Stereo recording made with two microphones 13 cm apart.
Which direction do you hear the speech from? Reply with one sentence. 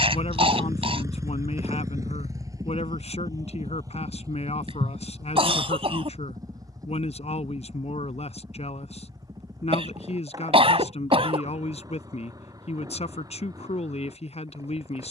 You can hear the speech on the left.